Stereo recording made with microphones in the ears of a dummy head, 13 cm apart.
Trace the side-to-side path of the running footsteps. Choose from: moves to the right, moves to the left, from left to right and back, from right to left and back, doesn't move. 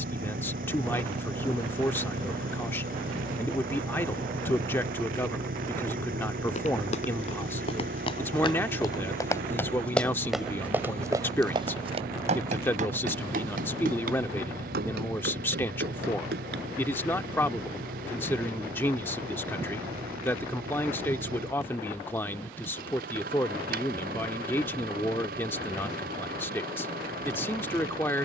moves to the right.